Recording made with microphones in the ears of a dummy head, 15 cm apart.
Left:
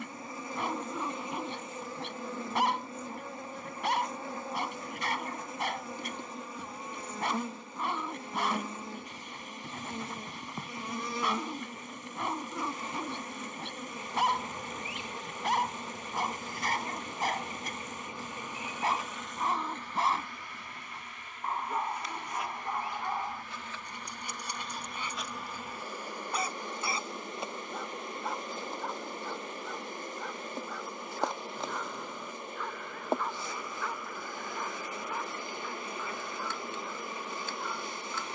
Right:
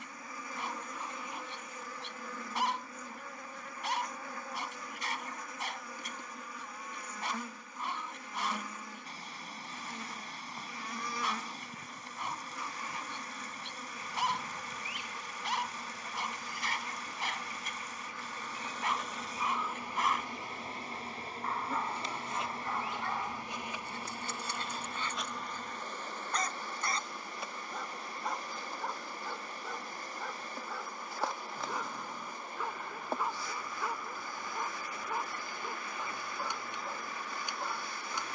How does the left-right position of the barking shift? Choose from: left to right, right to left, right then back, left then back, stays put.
left to right.